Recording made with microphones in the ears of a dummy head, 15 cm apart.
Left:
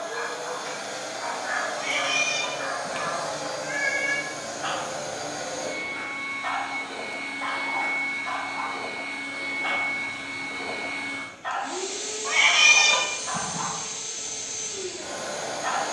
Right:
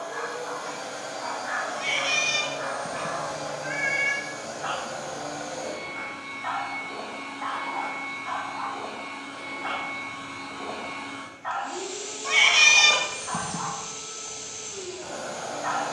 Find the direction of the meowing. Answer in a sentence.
You can hear the meowing on the right.